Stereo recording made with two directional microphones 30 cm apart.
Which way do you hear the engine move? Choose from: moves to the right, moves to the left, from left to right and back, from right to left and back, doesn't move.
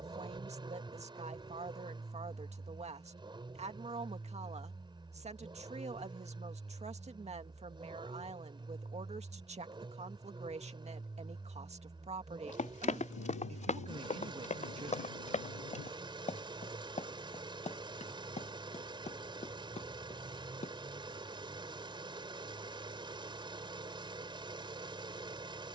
doesn't move.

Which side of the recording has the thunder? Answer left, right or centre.
left.